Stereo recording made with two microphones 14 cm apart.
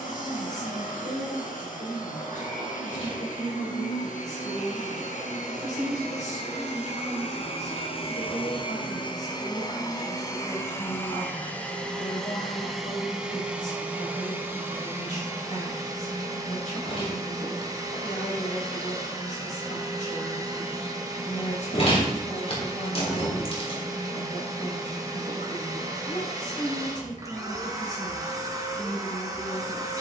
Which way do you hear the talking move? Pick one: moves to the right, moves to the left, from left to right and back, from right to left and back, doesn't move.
doesn't move.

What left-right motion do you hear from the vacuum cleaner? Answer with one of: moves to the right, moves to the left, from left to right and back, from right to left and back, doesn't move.
moves to the right.